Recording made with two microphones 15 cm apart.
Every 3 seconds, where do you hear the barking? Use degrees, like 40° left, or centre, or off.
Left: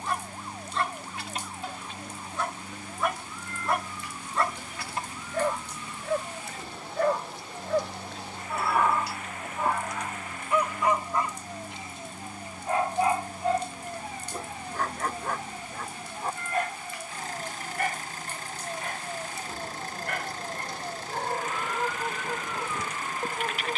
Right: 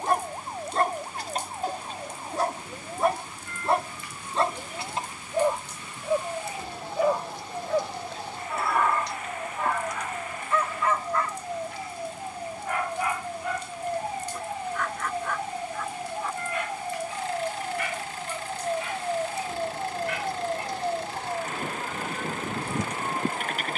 40° right, 30° right, centre, 10° left, 30° left, 40° left, 50° left, 50° left.